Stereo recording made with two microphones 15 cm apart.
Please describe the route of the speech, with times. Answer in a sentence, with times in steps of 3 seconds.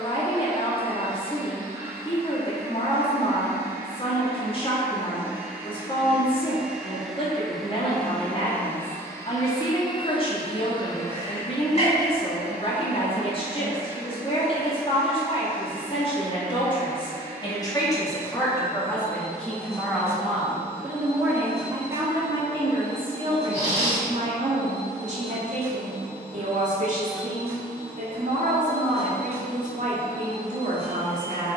You can hear the speech on the left from 0 s, in the centre from 18 s and on the right from 21 s.